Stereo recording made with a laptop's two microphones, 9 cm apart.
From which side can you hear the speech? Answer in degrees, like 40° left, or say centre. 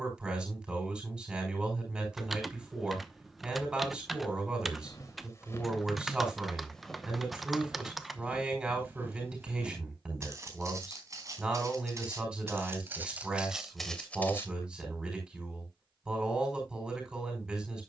10° right.